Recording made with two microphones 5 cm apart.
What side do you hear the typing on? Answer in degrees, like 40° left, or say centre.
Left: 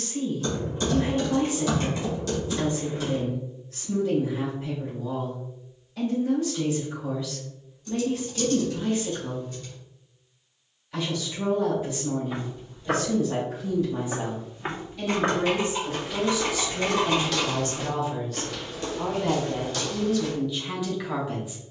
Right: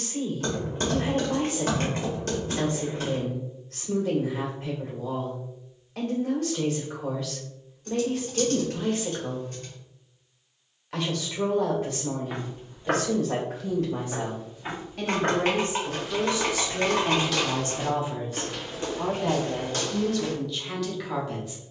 50° right.